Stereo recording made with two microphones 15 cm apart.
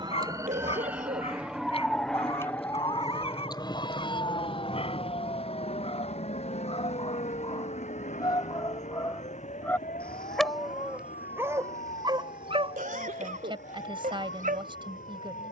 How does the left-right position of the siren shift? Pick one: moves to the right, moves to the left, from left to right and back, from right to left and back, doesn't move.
moves to the left.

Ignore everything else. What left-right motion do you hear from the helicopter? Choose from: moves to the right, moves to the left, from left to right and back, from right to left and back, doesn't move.
moves to the left.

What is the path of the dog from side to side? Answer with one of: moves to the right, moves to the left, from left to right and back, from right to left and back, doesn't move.
moves to the right.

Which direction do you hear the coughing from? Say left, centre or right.
right.